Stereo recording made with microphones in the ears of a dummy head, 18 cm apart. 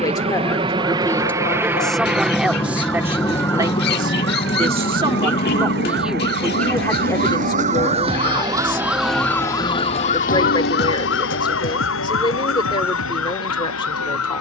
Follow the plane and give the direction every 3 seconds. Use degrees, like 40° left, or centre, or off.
10° right, 20° left, 50° left, 60° left, 70° left.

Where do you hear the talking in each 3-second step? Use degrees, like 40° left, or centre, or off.
centre, 20° right, 20° left, 20° left, 20° left.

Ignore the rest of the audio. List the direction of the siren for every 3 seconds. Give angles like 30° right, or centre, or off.
70° right, 60° right, 40° right, 40° left, 80° left.